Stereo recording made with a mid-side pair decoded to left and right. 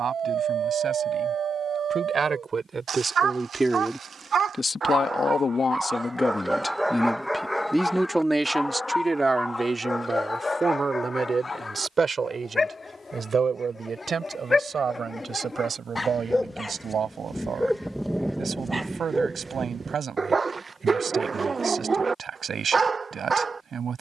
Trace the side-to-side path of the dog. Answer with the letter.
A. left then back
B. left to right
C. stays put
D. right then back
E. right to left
A.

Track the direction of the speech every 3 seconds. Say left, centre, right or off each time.
right, centre, centre, right, right, right, right, right.